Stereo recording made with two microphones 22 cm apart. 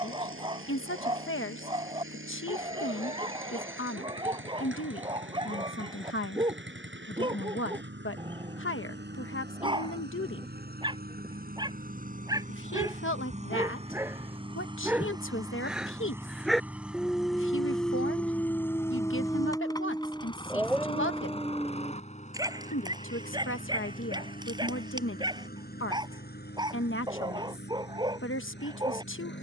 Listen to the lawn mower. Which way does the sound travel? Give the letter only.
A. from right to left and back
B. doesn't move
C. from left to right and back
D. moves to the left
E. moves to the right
D.